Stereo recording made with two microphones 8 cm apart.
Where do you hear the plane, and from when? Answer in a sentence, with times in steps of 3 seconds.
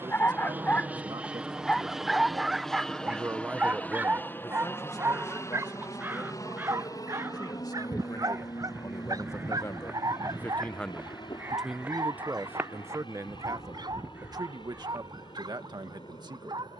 In this clip you hear the plane in the centre from 0 s and on the left from 3 s.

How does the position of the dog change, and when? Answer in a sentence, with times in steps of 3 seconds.
In this clip you hear the dog in the centre from 0 s and on the right from 3 s.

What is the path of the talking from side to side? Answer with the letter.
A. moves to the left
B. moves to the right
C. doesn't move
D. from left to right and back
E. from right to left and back
E.